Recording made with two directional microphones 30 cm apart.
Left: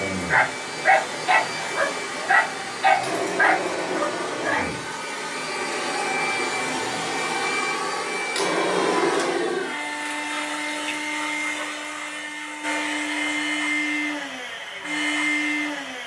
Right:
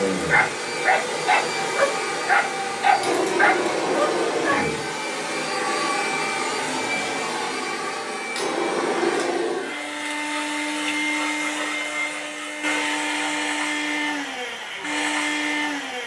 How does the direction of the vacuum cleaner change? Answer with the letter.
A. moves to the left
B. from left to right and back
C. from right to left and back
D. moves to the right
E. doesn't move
C.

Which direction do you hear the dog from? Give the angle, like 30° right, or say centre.
centre.